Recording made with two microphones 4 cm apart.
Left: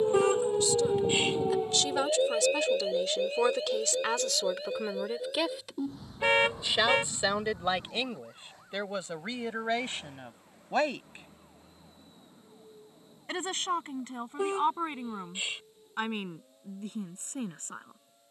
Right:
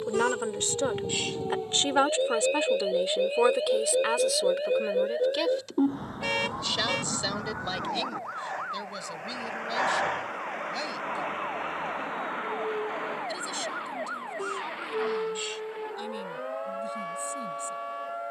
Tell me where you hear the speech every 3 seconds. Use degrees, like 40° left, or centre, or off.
40° right, centre, 30° left, 40° left, 50° left, 50° left.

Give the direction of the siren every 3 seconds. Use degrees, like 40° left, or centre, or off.
10° left, 30° right, 50° right, 60° right, 70° right, 70° right.